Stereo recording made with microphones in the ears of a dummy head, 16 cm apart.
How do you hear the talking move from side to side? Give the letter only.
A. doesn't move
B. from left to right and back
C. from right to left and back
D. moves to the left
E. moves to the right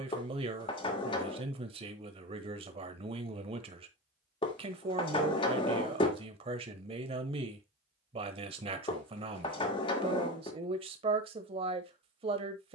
A.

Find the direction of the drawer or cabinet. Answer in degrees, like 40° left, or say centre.
30° left.